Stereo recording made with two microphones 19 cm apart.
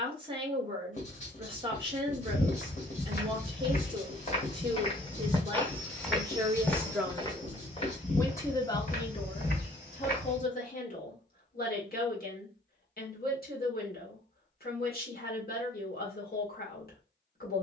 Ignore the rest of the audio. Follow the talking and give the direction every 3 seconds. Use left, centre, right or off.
right, right, centre, left, left, left.